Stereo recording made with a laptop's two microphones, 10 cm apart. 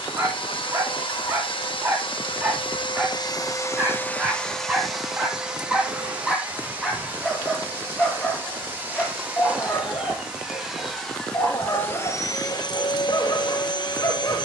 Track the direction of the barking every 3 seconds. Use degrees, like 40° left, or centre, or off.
30° right, 10° right, 10° left, 30° left, 40° left.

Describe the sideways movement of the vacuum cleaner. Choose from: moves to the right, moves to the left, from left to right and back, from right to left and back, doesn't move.
from left to right and back.